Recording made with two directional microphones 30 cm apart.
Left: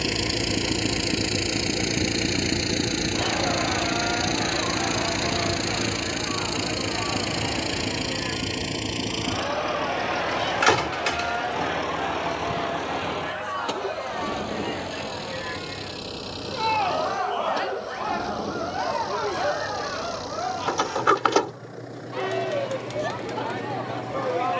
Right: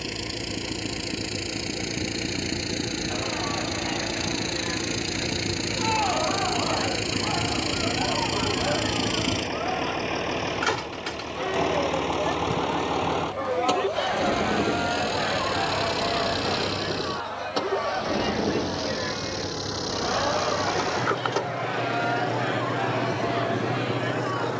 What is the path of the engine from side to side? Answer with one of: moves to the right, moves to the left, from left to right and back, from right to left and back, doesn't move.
moves to the right.